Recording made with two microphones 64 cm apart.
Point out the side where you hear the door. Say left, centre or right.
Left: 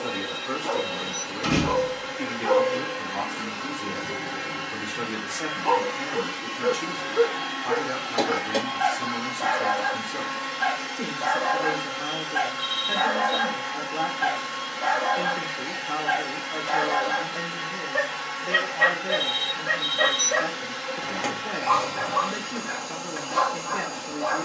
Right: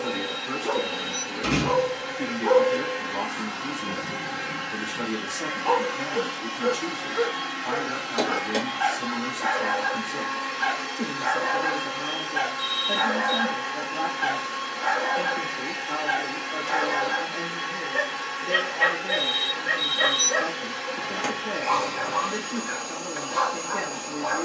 left.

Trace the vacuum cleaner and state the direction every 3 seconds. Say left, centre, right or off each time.
right, right, centre, left, left, left, left, left.